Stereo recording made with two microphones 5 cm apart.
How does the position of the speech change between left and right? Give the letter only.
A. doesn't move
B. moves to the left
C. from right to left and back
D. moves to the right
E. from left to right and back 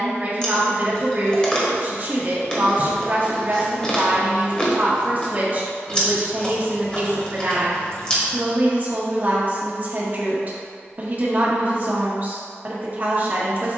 A.